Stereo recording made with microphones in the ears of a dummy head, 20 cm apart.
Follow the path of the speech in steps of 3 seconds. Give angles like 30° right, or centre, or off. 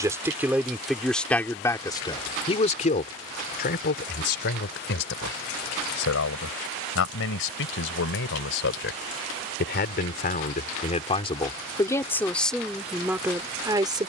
10° left, 50° left, 60° left, 40° left, 10° right.